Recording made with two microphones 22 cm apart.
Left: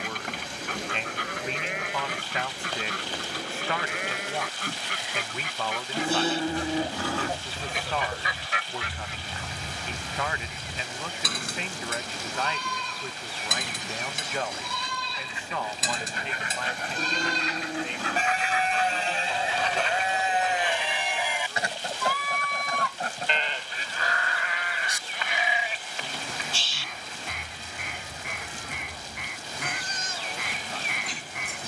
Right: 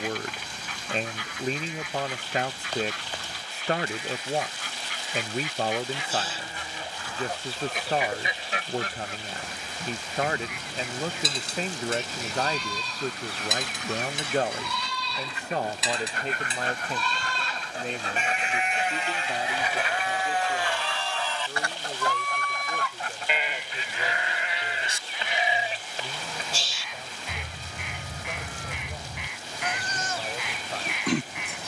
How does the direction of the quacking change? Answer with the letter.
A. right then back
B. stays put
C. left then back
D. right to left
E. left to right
A.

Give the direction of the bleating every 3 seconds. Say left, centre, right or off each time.
left, left, left, left, left, left, left, centre, right, right, right.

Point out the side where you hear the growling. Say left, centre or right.
left.